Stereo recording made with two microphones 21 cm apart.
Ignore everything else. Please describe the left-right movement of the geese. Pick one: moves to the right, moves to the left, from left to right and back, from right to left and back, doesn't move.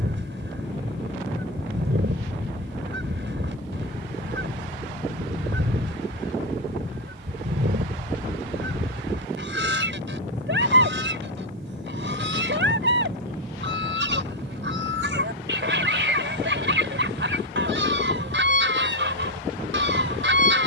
doesn't move.